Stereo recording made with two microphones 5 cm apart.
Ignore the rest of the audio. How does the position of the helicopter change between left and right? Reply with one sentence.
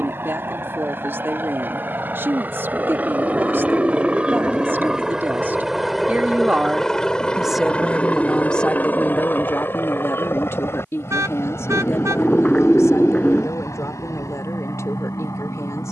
You can hear the helicopter move from right to left.